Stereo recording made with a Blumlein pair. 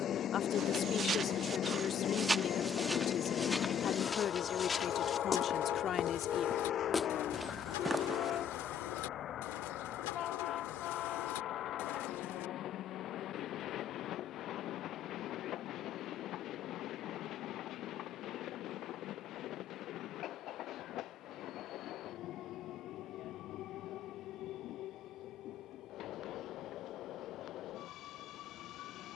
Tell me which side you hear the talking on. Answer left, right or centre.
left.